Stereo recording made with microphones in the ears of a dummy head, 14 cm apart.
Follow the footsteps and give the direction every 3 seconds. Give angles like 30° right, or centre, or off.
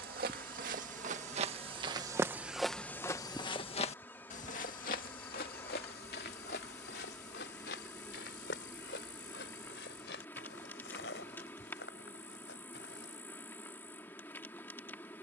30° right, 50° left, 70° left, 80° left, 80° left.